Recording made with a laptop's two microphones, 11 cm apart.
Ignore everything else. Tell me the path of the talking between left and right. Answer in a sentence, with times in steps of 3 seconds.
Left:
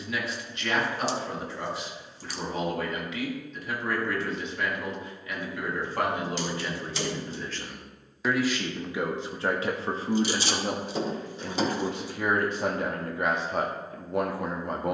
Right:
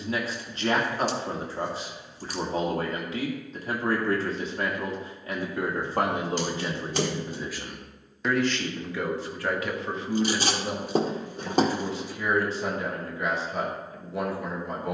In this clip you hear the talking on the right from 0 s, in the centre from 6 s and on the left from 9 s.